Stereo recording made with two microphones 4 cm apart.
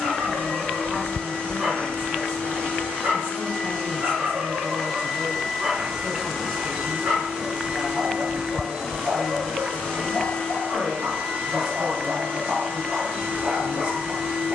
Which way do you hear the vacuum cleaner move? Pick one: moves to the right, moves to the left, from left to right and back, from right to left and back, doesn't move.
from left to right and back.